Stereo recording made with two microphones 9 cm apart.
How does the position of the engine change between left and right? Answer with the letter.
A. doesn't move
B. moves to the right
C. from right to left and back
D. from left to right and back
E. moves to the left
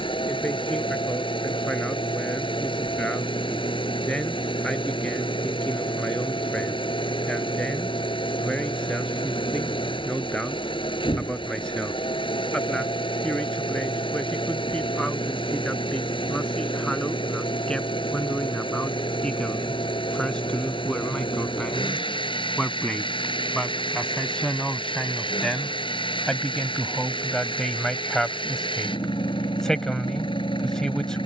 A.